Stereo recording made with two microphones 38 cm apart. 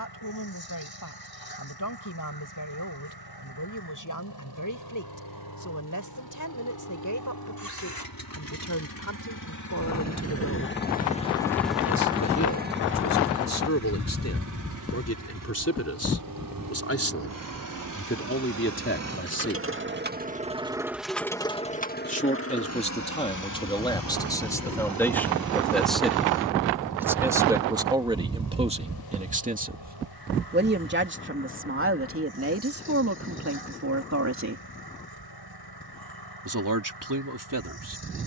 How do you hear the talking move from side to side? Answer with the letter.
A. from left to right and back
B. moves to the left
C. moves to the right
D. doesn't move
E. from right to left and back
C.